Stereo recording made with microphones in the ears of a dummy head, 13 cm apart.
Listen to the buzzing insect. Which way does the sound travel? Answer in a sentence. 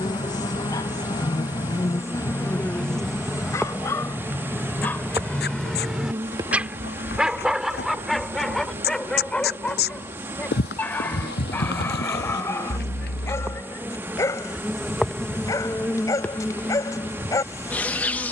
You can hear the buzzing insect go right and come back.